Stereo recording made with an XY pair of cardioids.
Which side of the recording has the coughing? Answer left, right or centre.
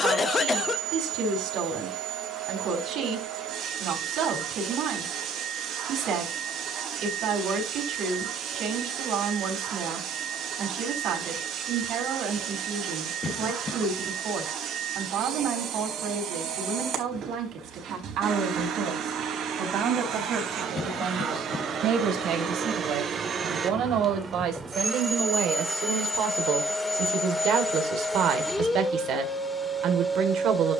left.